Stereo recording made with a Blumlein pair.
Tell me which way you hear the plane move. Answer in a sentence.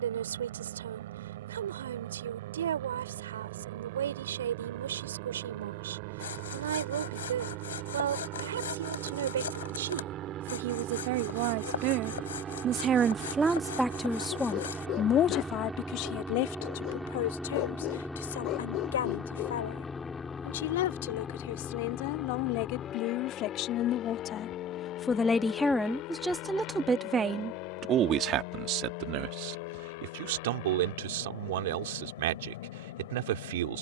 You can hear the plane move from right to left.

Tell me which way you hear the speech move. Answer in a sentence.
You can hear the speech go left and come back.